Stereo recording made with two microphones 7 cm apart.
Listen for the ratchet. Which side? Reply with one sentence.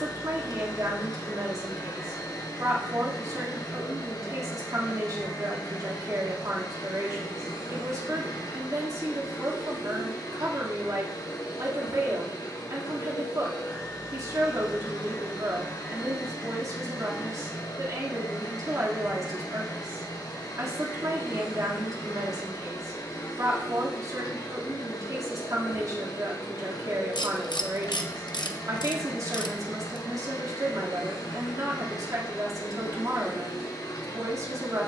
In this clip you hear the ratchet on the left.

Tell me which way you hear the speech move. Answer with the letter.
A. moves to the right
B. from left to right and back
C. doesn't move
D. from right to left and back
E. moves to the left
C.